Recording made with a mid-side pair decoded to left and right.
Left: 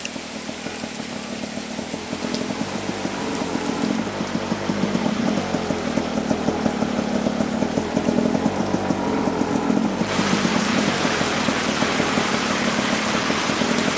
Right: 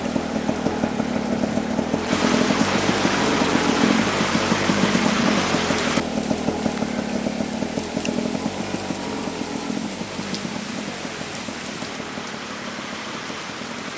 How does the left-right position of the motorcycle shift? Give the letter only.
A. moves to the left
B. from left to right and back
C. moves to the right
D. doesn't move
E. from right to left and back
A.